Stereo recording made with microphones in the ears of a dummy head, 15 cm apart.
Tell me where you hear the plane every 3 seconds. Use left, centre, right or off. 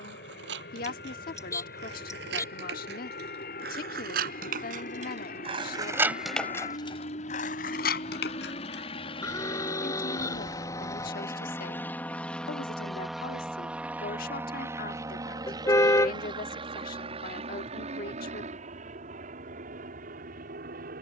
left, left, left, left, centre, right, right.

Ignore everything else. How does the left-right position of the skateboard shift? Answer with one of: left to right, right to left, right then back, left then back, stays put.
right to left.